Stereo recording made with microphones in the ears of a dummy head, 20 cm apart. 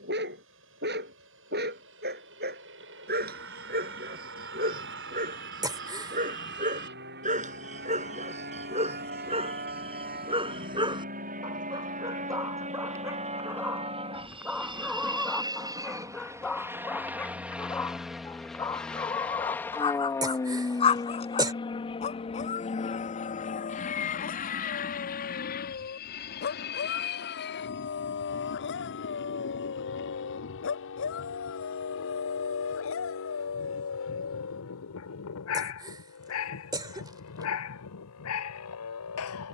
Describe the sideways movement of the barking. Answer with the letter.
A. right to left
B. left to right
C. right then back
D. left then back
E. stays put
A.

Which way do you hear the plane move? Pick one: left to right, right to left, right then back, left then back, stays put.
right to left.